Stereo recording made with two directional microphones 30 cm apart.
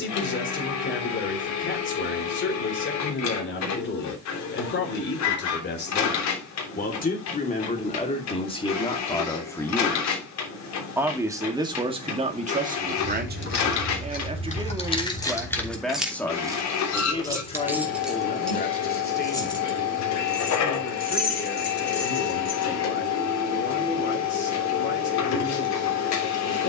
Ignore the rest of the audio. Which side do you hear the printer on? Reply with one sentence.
In this clip you hear the printer on the left.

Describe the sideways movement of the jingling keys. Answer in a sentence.
You can hear the jingling keys go right and come back.